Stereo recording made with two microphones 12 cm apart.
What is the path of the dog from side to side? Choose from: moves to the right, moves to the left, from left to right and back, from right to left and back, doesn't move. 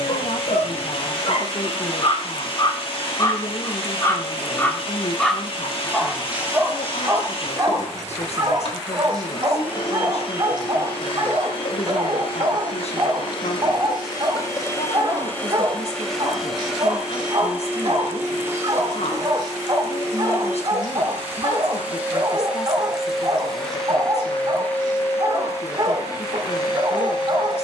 moves to the right.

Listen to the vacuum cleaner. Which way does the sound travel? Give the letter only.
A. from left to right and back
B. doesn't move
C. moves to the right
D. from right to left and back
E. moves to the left
A.